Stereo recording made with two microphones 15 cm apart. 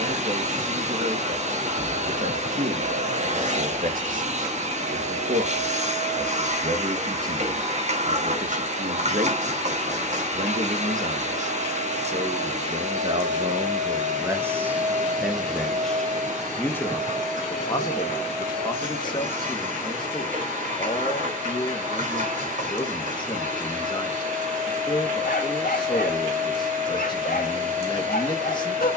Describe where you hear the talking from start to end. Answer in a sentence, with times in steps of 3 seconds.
In this clip you hear the talking on the right from 0 s, in the centre from 15 s and on the left from 18 s.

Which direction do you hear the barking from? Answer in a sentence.
You can hear the barking on the left.